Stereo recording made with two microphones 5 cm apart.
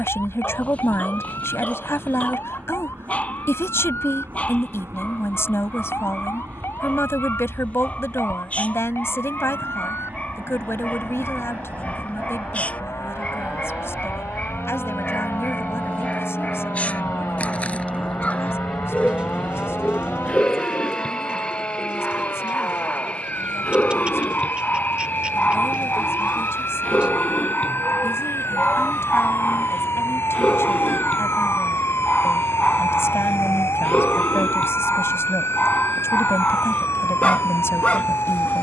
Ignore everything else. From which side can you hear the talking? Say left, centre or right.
left.